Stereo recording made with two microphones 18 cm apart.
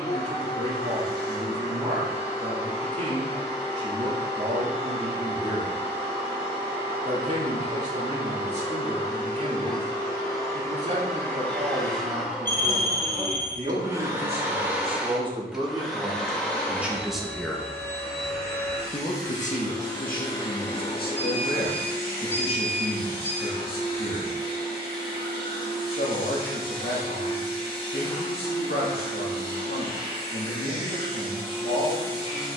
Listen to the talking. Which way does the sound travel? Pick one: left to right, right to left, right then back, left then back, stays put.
right to left.